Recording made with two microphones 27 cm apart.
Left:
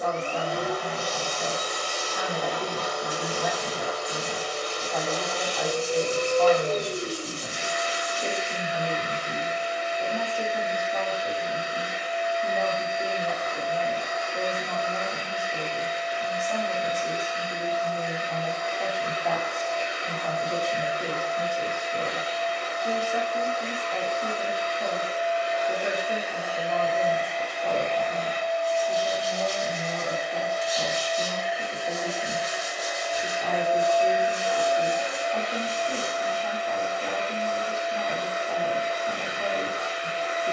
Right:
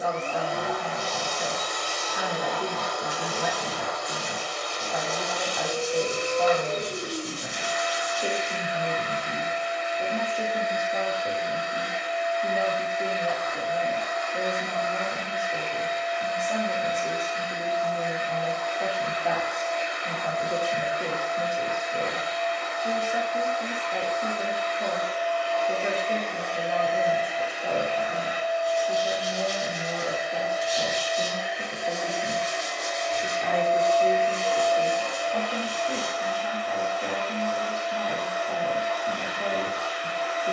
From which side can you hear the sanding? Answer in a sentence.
You can hear the sanding on the right.